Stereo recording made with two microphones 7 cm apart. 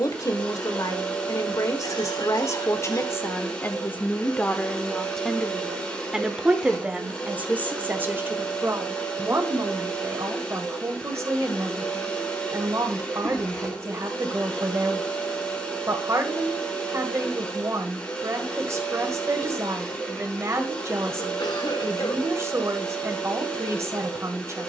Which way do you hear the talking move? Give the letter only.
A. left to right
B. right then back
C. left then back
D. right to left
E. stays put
A.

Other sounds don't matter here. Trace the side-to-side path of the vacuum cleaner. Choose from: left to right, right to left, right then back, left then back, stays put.
stays put.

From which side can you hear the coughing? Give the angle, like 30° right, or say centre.
80° left.